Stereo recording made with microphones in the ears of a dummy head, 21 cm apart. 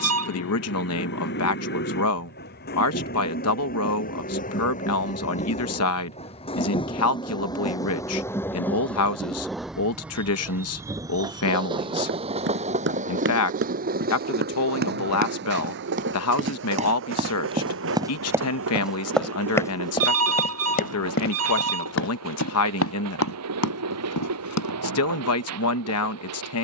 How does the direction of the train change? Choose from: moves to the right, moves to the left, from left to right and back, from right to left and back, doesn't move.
moves to the right.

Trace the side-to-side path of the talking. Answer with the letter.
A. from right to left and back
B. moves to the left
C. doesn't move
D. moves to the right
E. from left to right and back
C.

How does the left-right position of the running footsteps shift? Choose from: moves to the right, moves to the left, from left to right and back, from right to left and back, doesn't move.
moves to the left.